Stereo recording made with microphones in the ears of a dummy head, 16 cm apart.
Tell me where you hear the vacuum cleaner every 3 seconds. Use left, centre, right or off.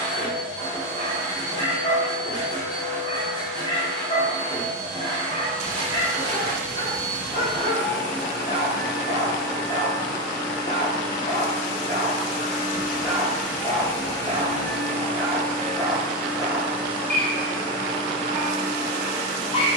right, right, right, right, centre, centre, right.